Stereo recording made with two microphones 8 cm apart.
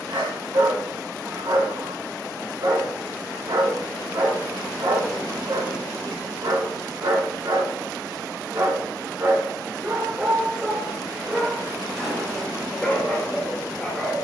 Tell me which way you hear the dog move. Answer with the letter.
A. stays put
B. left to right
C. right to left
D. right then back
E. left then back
C.